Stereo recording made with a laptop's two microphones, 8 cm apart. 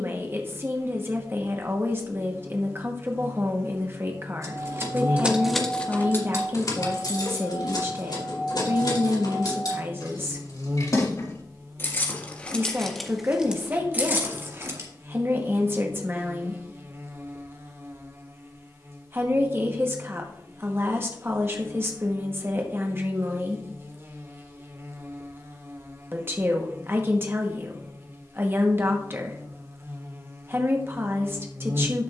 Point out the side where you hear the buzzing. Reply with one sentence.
You can hear the buzzing on the right.